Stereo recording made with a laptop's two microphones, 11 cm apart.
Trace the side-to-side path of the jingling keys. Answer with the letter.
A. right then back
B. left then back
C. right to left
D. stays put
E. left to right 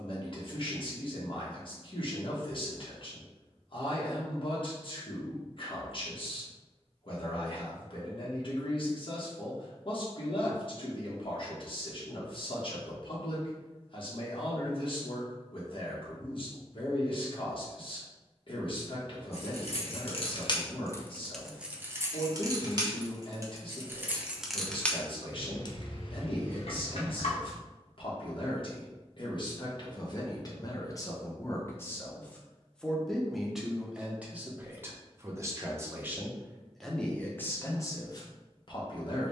A.